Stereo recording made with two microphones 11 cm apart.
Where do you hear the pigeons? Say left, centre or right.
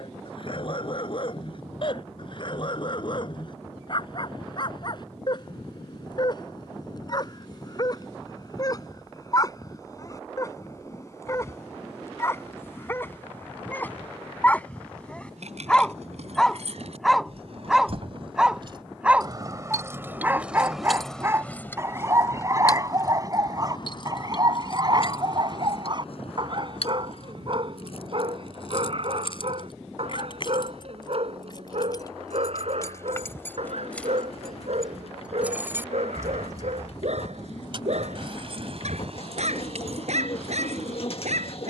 left.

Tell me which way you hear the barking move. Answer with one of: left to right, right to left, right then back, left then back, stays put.
left to right.